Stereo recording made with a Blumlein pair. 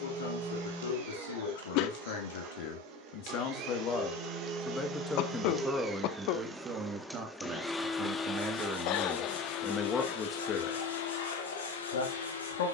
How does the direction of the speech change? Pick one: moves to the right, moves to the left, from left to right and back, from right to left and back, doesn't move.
from left to right and back.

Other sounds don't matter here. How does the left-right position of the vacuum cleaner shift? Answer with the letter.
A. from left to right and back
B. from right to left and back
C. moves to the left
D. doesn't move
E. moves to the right
C.